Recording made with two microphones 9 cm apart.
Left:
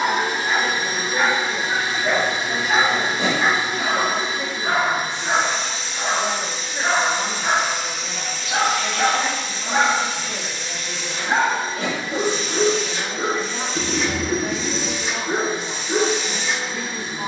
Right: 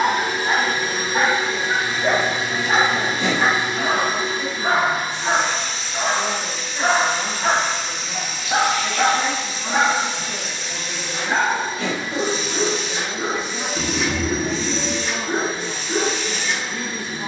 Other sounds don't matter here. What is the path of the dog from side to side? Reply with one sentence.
You can hear the dog move from right to left.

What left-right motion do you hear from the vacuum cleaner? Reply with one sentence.
You can hear the vacuum cleaner move from left to right and back again.